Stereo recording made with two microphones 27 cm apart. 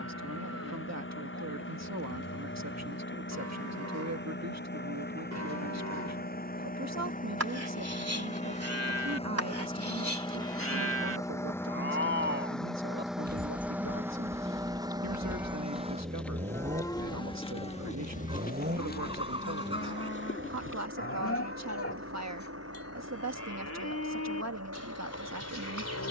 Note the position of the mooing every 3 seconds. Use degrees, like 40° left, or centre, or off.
80° right, 70° right, 60° right, 50° right, 30° right, 10° left, 40° left, 60° left, 60° left.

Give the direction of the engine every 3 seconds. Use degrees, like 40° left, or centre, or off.
50° left, 40° left, 30° left, 10° left, centre, 20° right, 40° right, 60° right, 60° right.